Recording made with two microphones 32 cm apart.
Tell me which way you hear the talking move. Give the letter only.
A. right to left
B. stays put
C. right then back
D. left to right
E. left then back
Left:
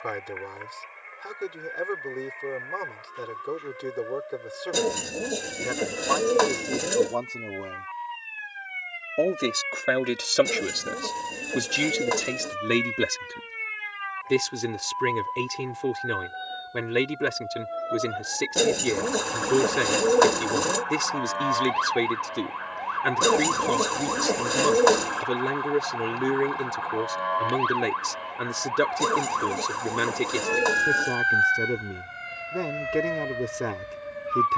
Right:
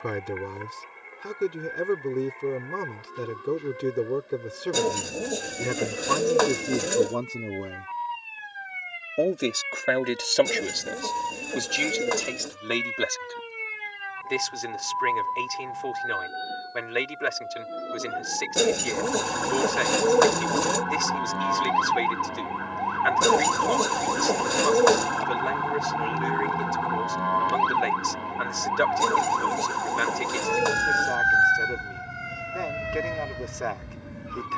A.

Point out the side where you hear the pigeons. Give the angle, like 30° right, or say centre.
centre.